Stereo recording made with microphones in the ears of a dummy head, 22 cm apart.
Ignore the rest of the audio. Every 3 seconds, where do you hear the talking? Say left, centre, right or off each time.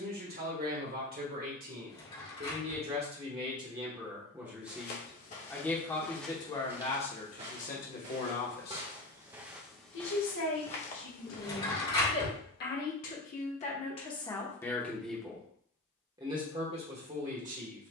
right, centre, left, left, left, right.